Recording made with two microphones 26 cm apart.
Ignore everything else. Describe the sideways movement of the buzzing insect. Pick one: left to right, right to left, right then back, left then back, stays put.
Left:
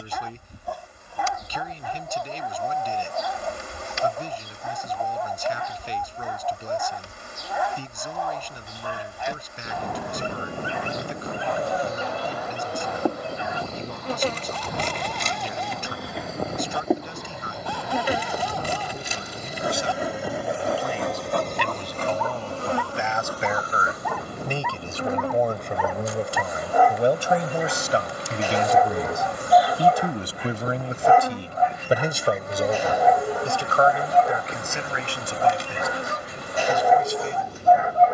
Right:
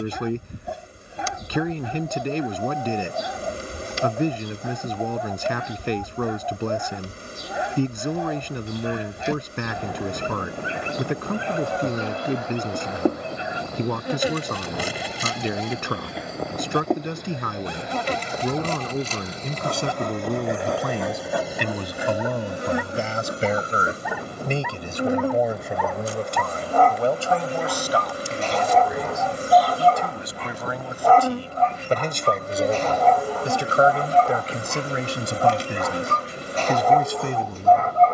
left then back.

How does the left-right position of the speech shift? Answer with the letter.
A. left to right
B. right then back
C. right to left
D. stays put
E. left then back
E.